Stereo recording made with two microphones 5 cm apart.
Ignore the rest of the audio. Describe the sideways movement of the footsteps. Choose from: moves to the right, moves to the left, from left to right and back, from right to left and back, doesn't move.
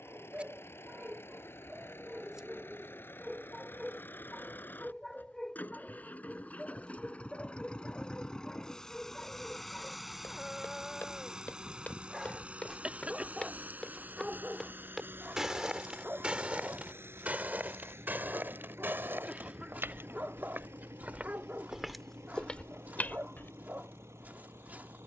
from left to right and back.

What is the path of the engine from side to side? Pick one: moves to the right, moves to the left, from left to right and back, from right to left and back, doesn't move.
moves to the right.